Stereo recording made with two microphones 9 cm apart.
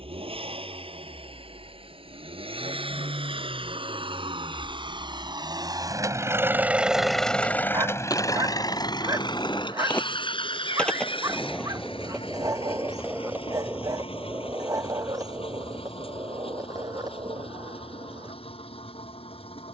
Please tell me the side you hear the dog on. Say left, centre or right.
right.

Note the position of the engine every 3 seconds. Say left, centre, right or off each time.
right, right, centre, left, left, left, left.